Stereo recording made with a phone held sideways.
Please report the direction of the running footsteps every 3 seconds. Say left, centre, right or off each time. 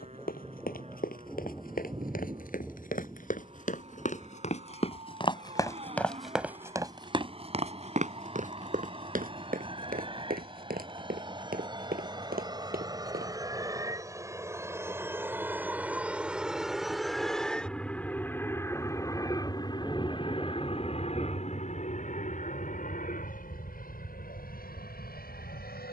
left, left, right, right, right, off, off, off, off.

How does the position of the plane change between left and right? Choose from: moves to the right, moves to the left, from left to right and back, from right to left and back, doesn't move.
moves to the left.